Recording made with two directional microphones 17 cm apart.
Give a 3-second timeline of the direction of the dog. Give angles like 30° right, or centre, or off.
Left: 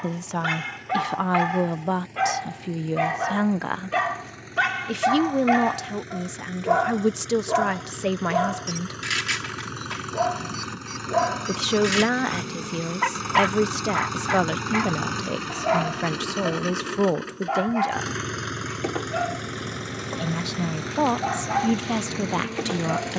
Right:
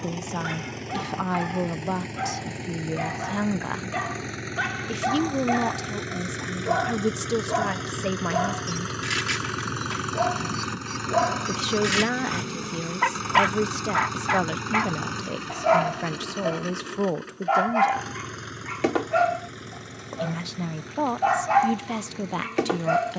40° left, 30° left, 20° left, 10° left, 10° right, 20° right, 30° right, 30° right.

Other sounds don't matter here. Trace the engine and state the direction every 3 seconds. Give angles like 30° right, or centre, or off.
60° right, 50° right, 40° right, 20° right, 10° left, 30° left, 50° left, 60° left.